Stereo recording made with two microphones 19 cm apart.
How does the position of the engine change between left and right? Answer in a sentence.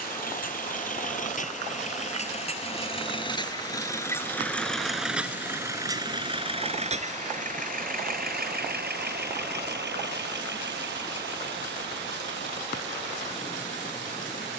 In this clip you hear the engine move from left to right.